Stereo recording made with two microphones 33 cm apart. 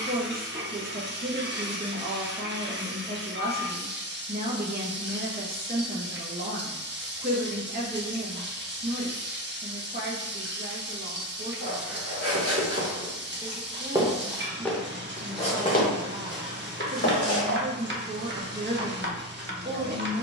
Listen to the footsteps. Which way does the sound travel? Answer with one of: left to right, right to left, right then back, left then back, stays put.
left then back.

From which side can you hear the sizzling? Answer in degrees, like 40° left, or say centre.
30° right.